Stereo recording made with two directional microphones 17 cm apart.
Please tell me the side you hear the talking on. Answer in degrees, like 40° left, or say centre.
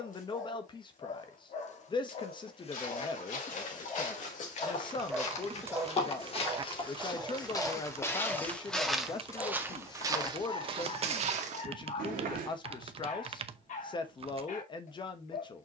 30° left.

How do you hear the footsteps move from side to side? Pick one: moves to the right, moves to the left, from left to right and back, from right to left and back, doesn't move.
moves to the right.